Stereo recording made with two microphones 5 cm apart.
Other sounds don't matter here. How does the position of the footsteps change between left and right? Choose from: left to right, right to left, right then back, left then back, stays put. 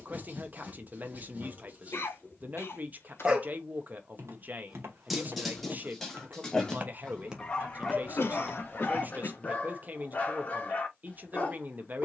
right to left.